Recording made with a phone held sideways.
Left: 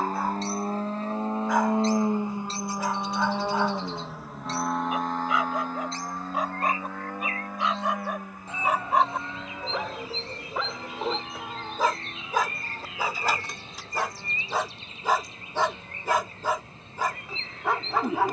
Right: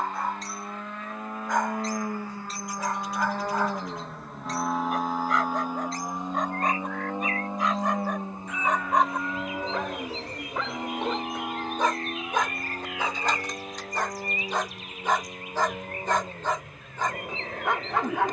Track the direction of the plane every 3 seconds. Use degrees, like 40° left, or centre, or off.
30° left, centre, 20° right, 30° right, 40° right, 50° right.